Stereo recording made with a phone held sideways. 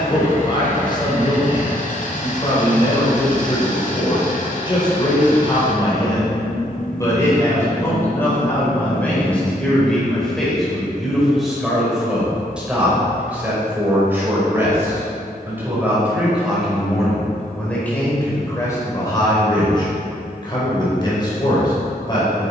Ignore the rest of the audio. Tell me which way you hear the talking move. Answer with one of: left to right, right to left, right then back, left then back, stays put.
right then back.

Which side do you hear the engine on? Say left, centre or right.
left.